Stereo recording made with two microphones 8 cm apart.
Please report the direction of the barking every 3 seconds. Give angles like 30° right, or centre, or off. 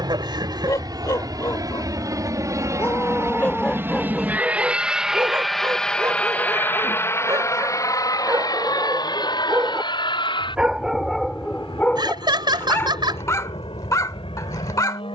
40° left, 10° right, 40° right, 10° right, 30° left.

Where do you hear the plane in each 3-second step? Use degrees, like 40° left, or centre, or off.
50° right, 20° right, 30° left, 60° left, 70° left.